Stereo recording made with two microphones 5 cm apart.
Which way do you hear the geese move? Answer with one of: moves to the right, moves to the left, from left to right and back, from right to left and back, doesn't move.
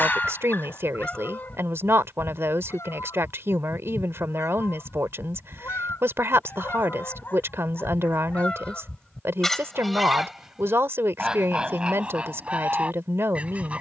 from right to left and back.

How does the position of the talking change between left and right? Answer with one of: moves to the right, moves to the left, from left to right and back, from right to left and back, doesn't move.
doesn't move.